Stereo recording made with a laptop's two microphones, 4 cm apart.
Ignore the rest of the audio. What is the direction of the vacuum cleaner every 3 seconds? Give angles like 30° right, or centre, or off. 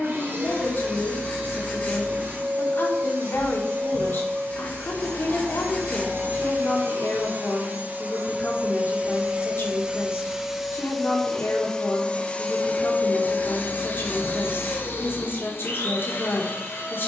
60° right, 60° right, 50° right, 10° right, 40° left, 60° left.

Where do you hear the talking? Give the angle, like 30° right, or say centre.
60° left.